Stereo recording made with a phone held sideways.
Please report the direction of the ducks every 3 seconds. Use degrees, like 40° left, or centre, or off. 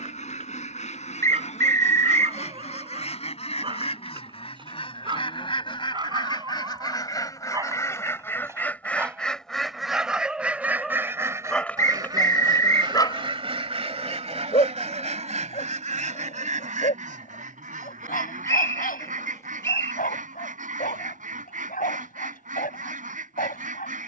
50° left, 40° left, 20° left, 10° right, 40° right, 60° right, 70° right, 70° right.